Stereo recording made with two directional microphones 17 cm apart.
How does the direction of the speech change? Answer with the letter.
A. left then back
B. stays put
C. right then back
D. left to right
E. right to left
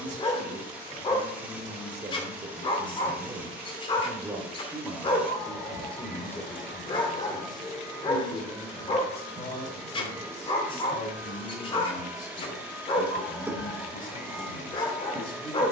E.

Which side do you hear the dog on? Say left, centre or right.
left.